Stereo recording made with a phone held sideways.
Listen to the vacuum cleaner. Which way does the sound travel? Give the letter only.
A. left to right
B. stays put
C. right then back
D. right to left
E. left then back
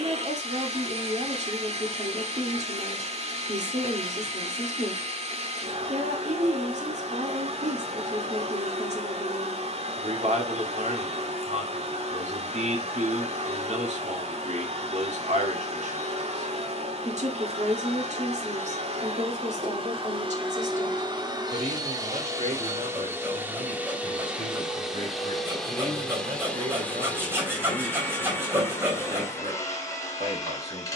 D.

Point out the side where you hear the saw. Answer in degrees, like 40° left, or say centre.
20° right.